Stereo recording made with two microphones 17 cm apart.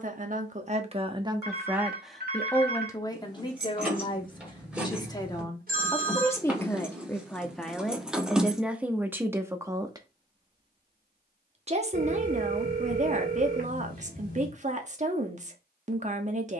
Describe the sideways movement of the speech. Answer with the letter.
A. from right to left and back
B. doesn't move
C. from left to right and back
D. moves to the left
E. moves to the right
A.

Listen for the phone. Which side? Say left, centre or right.
right.